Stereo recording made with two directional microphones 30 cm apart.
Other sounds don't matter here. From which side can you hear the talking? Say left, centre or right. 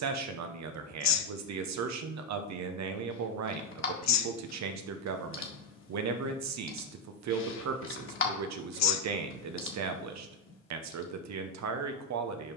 right.